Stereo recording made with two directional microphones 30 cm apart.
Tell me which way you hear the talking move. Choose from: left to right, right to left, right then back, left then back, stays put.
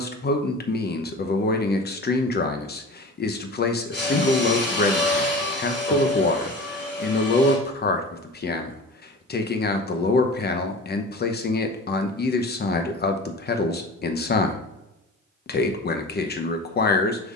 stays put.